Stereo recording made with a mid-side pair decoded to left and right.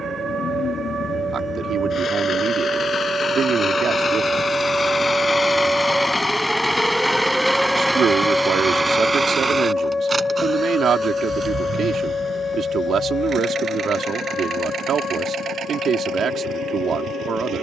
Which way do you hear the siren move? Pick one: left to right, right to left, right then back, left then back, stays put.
right to left.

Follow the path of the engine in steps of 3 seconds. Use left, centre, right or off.
left, left, centre, right, right, right.